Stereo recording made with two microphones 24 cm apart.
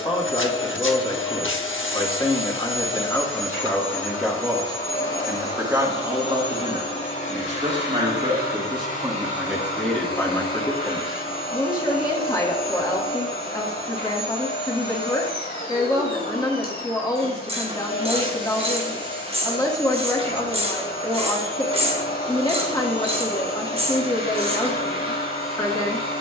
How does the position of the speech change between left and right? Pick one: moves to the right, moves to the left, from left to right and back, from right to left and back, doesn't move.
from left to right and back.